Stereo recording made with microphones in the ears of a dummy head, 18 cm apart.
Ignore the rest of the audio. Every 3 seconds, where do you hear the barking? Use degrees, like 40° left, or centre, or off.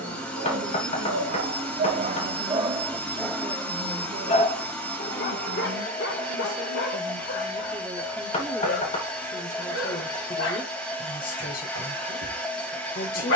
40° right, 30° left, 60° left, 70° left, 80° left.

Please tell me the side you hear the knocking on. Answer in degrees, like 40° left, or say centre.
30° left.